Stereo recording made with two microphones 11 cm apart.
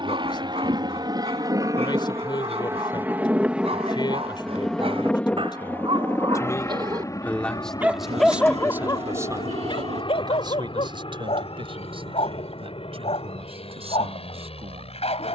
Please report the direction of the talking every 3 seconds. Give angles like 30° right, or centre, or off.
50° left, 50° left, centre, 40° right, 60° right.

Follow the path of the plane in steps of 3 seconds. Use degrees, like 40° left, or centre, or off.
40° right, centre, 30° left, 50° left, 50° left.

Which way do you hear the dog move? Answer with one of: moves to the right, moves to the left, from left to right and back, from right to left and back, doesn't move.
moves to the left.